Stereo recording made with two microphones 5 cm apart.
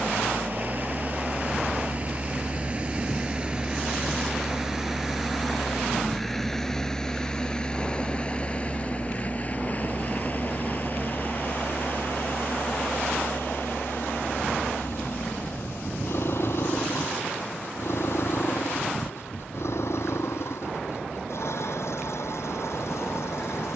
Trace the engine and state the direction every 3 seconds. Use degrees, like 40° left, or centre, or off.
30° right, 10° right, 20° left, 40° left, 50° left, 60° left, 70° left, 70° left.